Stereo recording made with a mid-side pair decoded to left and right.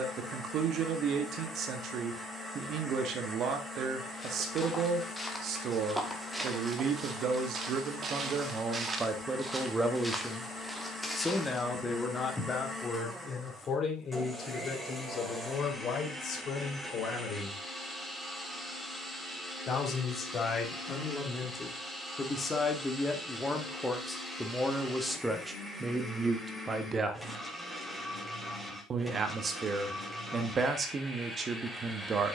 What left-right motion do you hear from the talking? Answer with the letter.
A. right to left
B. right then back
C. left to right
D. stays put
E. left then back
E.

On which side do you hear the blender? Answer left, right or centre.
centre.